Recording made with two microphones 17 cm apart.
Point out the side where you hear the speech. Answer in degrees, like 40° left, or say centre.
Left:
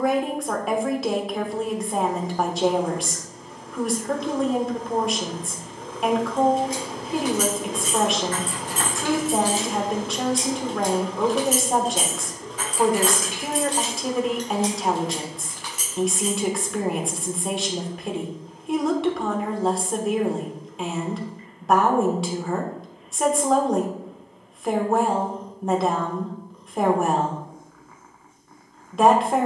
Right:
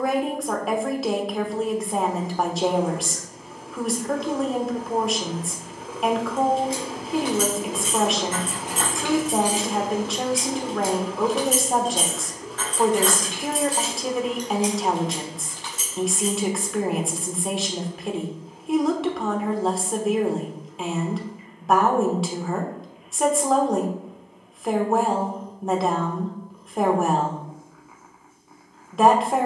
centre.